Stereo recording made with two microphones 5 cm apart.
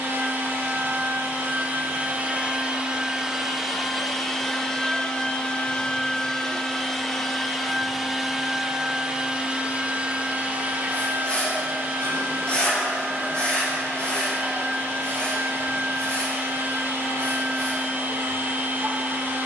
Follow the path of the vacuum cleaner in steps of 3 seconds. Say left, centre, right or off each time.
right, centre, centre, right, right, right, right.